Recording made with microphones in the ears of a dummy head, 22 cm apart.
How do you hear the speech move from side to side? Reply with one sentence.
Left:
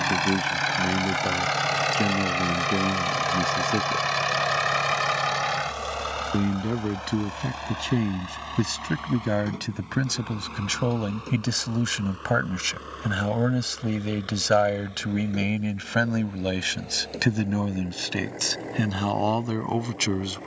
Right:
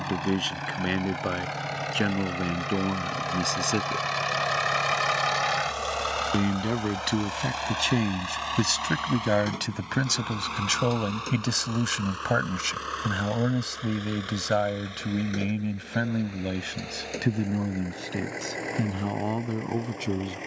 You can hear the speech move from right to left.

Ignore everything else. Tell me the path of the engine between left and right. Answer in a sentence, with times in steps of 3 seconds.
You can hear the engine on the left from 0 s, in the centre from 3 s and on the right from 6 s.